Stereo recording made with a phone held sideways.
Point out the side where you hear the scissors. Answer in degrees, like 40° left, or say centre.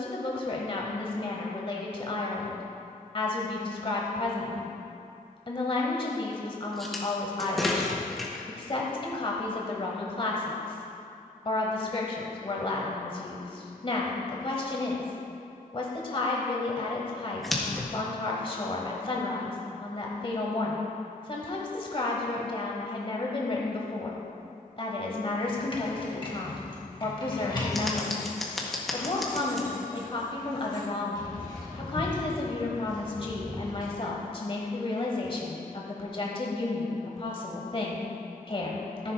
centre.